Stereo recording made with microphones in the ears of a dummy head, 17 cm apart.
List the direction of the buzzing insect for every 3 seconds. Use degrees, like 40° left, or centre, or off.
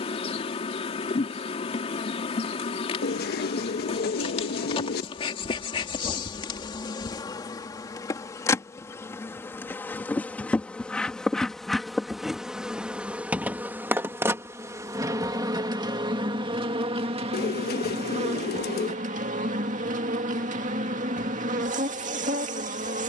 30° left, 30° left, 20° left, 10° left, 10° right, 30° right, 40° right, 40° right.